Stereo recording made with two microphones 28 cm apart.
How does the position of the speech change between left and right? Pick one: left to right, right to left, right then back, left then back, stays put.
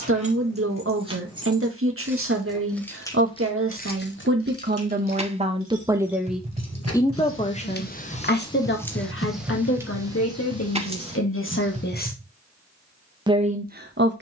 left then back.